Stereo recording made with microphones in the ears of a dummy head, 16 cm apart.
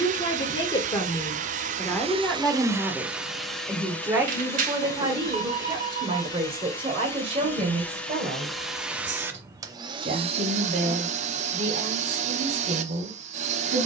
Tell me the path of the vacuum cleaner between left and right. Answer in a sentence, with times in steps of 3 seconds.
You can hear the vacuum cleaner on the right from 0 s, in the centre from 3 s and on the right from 9 s.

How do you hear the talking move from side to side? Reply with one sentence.
You can hear the talking move from left to right.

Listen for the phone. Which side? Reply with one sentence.
You can hear the phone on the right.